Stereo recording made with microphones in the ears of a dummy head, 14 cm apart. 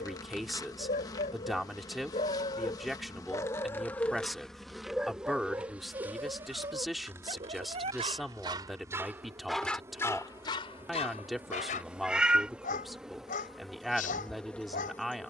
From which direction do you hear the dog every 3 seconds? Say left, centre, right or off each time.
left, centre, right, left, left.